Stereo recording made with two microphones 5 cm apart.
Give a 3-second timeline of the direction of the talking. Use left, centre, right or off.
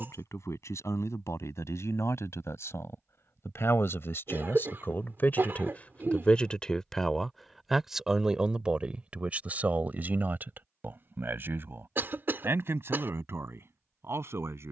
left, left, centre, right, right.